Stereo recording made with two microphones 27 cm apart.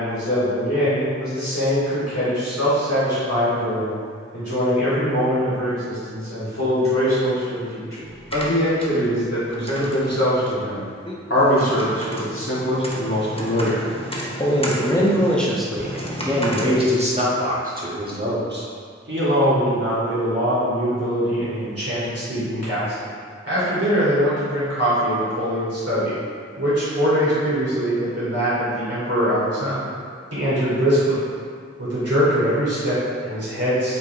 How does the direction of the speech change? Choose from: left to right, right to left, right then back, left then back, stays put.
left to right.